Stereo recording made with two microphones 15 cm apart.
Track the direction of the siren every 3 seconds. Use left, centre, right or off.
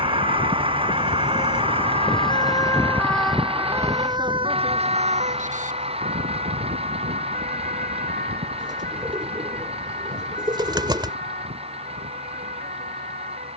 left, right, right, right, right.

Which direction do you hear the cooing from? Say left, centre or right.
right.